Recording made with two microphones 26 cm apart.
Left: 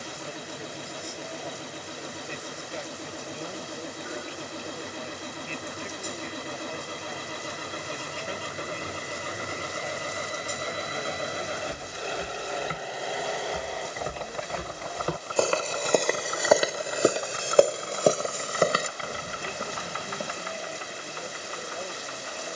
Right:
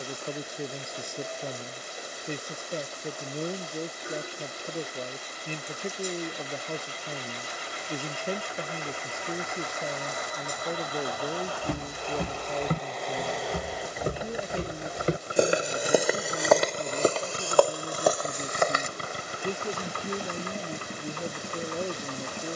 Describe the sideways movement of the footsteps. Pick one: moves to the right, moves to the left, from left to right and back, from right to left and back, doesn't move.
moves to the left.